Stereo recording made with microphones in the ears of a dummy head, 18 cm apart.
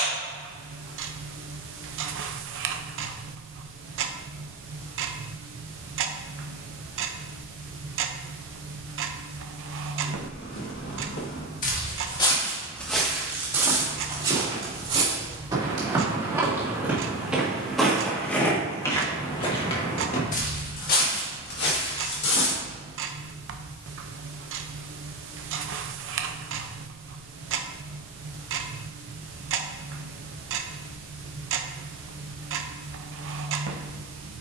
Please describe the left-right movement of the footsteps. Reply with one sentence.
You can hear the footsteps go right and come back.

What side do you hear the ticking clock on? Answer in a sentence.
You can hear the ticking clock on the right.